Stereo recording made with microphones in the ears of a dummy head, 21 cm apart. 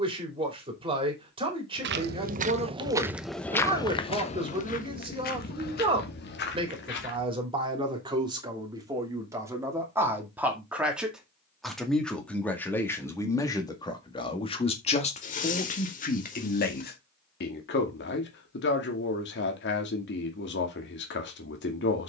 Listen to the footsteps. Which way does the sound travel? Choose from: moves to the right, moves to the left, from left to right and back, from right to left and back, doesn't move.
moves to the left.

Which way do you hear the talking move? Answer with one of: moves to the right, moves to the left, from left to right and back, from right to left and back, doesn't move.
moves to the left.